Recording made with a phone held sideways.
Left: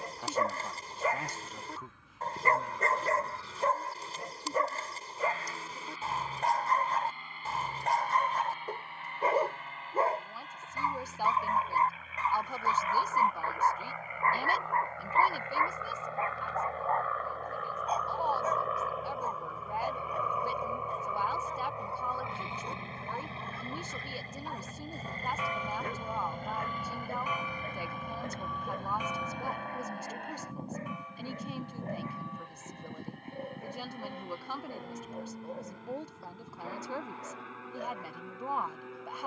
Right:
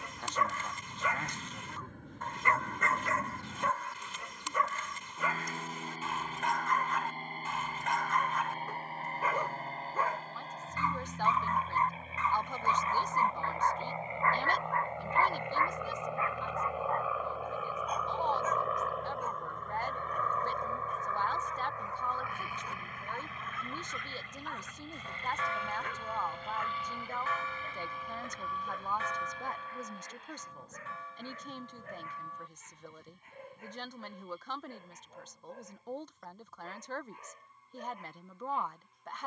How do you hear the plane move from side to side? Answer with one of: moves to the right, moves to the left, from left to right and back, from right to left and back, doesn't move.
moves to the left.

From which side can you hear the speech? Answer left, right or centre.
centre.